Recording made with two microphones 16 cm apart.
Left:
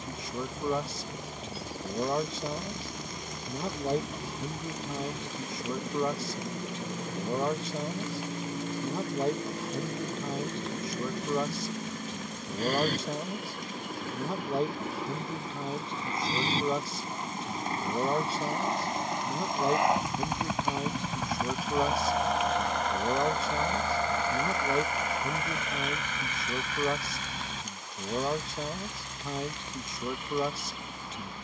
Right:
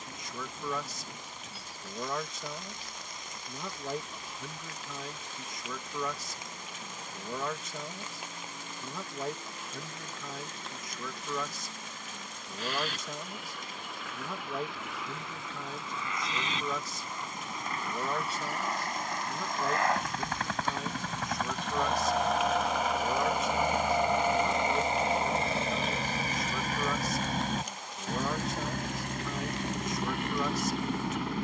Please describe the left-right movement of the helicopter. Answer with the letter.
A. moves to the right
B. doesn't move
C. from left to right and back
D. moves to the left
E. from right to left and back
A.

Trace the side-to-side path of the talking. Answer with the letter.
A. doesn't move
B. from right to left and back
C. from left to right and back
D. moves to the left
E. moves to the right
A.